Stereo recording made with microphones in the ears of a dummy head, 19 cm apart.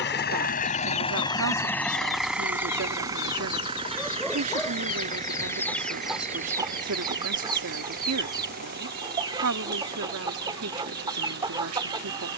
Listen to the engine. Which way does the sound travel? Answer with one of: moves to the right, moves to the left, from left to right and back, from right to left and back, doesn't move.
moves to the right.